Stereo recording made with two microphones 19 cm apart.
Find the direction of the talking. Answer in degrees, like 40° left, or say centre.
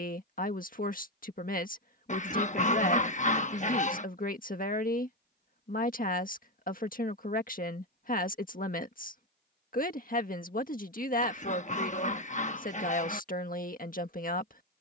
50° left.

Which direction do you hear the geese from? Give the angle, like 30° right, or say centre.
40° left.